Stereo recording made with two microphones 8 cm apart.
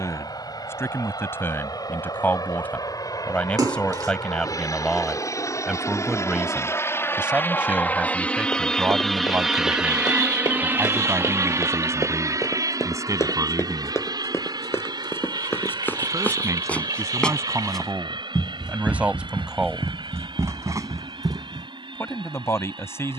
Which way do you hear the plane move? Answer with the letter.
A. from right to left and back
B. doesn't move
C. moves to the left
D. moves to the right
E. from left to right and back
D.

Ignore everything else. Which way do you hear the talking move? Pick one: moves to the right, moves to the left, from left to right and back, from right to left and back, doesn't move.
from left to right and back.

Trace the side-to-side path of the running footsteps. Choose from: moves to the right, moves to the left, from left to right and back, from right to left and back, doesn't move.
moves to the right.